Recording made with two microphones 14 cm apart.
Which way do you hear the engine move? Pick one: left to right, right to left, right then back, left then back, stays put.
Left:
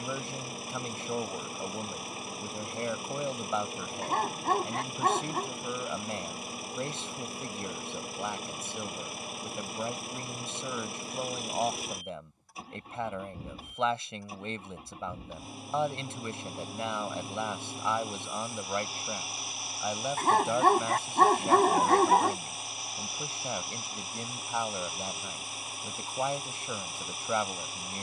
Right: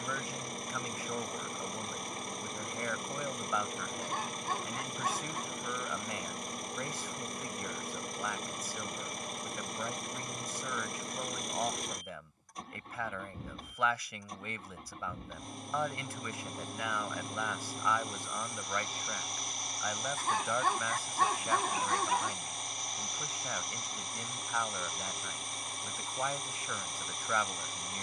stays put.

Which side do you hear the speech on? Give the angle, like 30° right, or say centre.
30° left.